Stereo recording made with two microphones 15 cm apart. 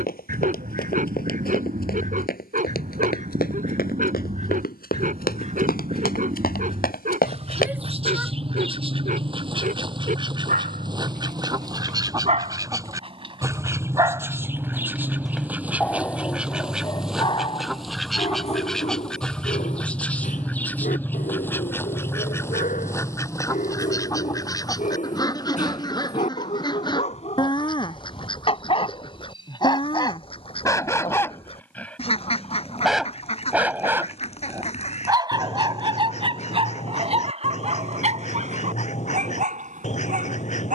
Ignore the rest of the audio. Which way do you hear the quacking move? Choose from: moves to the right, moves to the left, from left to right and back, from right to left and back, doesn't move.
moves to the left.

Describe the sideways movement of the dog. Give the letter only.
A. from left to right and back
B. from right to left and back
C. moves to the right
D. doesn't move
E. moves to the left
B.